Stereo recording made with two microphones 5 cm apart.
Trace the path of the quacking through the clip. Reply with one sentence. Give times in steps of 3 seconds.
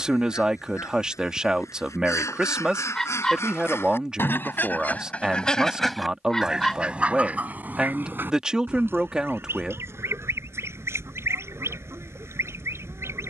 In this clip you hear the quacking on the left from 0 s and on the right from 6 s.